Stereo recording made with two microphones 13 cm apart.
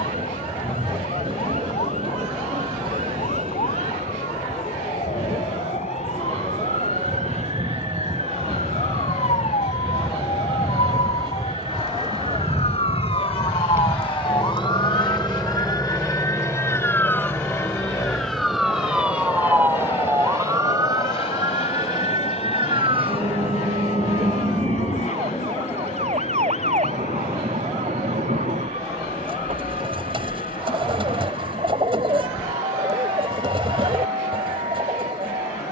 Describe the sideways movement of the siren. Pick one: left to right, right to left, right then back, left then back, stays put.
left to right.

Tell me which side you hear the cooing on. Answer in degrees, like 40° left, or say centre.
40° right.